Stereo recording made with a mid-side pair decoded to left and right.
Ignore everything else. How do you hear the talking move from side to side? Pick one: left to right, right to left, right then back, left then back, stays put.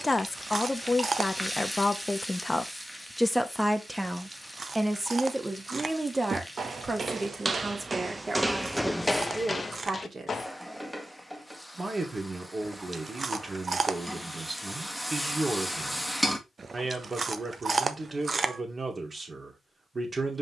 left to right.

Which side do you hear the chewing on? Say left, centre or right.
right.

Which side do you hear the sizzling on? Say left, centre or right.
centre.